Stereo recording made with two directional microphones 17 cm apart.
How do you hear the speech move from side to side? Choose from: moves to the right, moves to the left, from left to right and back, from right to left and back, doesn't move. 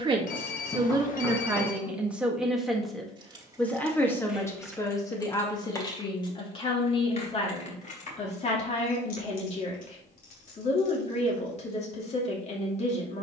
moves to the left.